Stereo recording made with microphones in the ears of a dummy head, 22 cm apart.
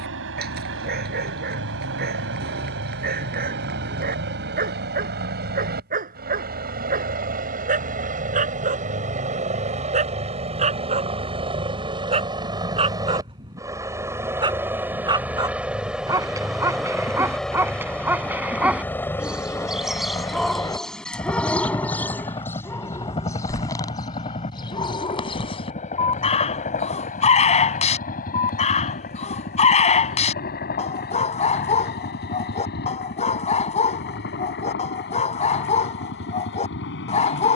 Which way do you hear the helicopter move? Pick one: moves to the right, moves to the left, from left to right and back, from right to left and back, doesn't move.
moves to the left.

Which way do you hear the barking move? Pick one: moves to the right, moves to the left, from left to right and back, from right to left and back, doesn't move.
moves to the left.